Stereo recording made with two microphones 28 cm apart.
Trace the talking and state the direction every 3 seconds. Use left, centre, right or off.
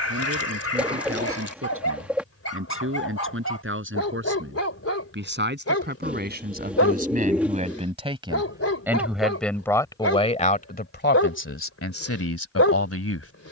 right, right, right, left, left.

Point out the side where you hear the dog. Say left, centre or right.
left.